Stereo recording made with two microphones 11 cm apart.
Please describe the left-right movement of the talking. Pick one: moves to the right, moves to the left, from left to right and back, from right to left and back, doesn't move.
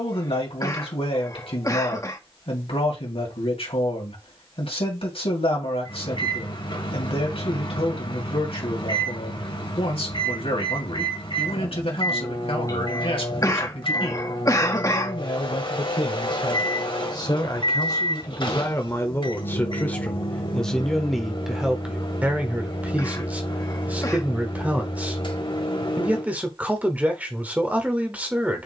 moves to the right.